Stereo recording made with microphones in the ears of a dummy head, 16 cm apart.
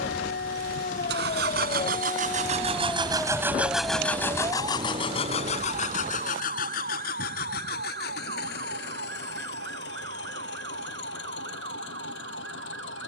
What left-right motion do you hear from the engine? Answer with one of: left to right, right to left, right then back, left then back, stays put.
right to left.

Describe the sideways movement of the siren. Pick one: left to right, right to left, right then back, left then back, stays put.
left to right.